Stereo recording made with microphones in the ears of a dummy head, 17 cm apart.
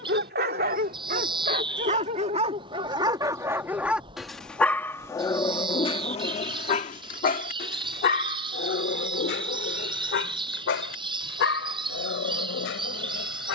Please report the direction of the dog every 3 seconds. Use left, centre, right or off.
right, centre, left, left, left.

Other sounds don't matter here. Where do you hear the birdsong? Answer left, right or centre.
right.